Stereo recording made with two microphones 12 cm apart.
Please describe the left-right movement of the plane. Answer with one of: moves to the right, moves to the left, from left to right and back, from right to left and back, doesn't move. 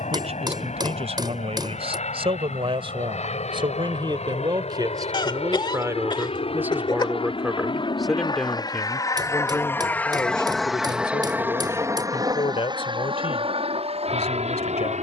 moves to the right.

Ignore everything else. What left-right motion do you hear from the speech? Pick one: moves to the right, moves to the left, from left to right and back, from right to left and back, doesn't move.
moves to the left.